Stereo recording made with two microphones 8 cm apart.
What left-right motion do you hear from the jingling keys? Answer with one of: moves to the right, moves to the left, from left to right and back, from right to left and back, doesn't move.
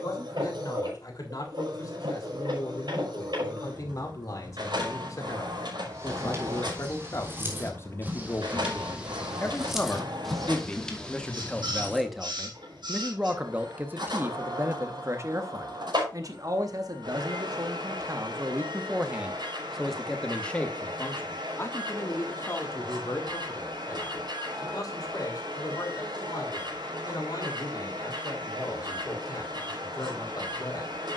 moves to the left.